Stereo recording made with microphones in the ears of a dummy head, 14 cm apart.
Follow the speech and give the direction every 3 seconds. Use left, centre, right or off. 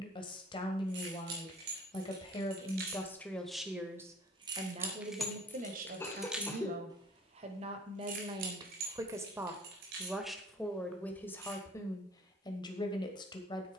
left, right, right, centre, left.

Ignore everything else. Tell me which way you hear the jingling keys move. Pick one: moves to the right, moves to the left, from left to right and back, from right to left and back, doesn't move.
from right to left and back.